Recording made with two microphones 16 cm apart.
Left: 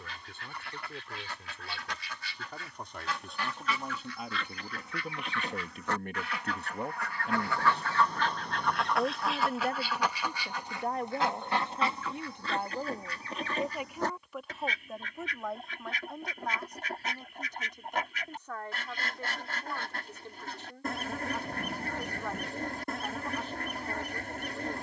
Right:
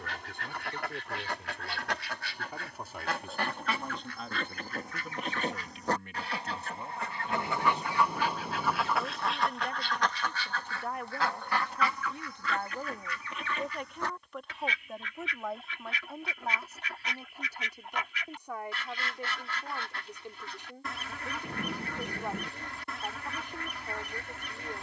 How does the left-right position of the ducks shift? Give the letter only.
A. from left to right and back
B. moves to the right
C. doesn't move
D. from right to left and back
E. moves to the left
E.